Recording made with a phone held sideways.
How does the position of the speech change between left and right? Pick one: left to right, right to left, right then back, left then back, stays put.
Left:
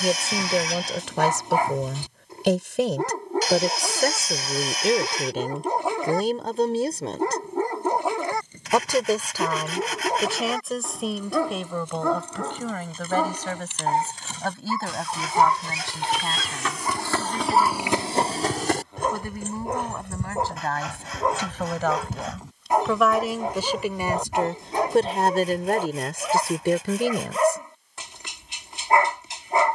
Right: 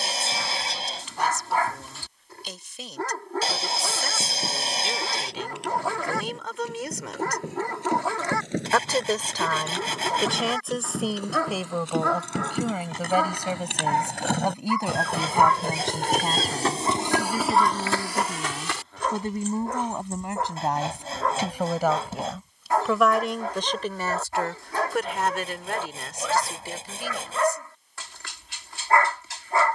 right then back.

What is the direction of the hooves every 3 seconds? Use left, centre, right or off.
off, right, right, right, right, right, left, left, left, off.